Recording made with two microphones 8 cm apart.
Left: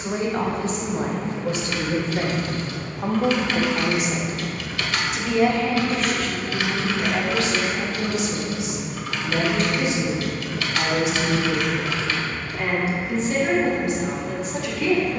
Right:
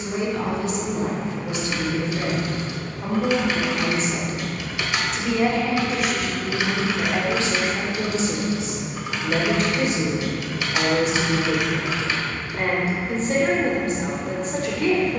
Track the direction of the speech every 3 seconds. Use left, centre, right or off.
left, centre, right, right, right.